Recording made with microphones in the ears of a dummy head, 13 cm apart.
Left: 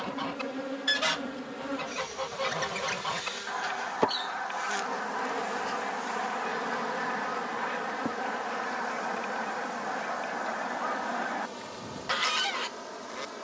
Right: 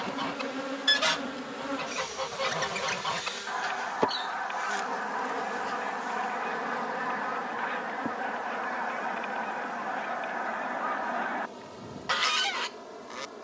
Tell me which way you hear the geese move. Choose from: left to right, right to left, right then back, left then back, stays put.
stays put.